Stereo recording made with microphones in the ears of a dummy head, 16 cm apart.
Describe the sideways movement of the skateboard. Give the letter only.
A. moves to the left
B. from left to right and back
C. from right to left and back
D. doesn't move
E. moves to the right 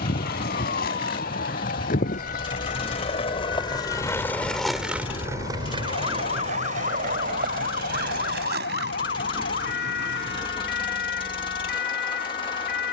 E.